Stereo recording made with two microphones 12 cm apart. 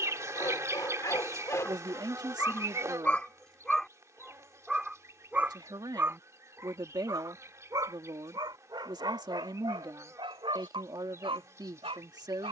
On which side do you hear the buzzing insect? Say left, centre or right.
right.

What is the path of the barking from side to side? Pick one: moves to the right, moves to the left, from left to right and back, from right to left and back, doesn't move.
moves to the right.